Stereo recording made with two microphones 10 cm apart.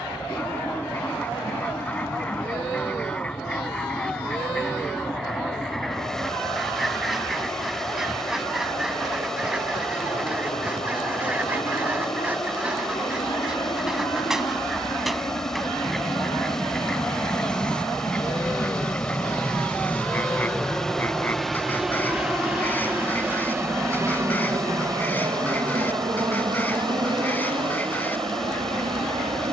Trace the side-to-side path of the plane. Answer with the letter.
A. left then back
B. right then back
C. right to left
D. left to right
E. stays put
D.